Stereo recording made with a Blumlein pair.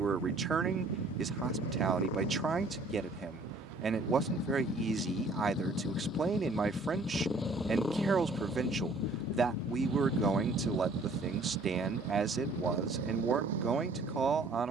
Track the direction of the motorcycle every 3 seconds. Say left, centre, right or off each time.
left, left, centre, right, right.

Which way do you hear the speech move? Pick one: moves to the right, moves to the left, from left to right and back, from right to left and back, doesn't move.
doesn't move.